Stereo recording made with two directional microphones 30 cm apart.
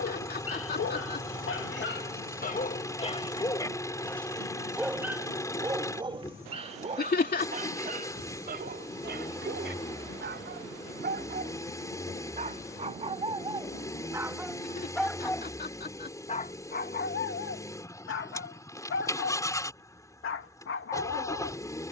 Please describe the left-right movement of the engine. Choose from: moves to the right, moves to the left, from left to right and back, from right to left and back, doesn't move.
doesn't move.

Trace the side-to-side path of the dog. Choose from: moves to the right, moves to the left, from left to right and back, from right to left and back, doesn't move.
from left to right and back.